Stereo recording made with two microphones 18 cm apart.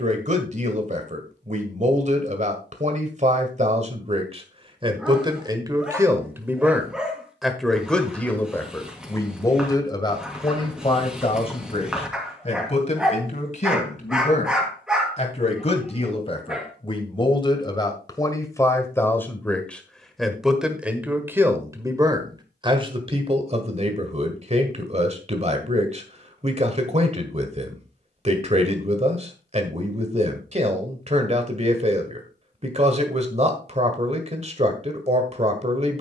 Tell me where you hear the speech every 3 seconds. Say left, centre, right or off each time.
right, right, centre, left, left, left, centre, right, right, right, right, right.